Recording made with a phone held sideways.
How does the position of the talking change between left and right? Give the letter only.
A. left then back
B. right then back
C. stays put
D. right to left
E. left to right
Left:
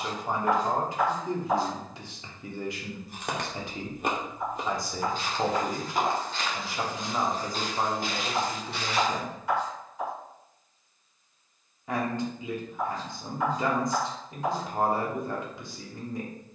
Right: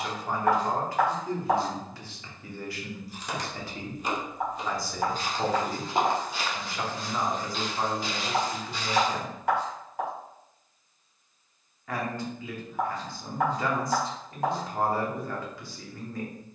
C.